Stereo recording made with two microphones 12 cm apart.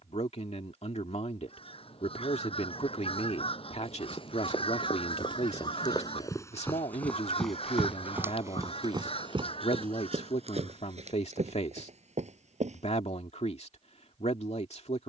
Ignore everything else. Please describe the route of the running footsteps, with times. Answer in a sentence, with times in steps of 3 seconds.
You can hear the running footsteps not at all from 0 s, on the left from 3 s, in the centre from 6 s and on the right from 9 s.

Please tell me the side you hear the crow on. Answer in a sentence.
You can hear the crow on the left.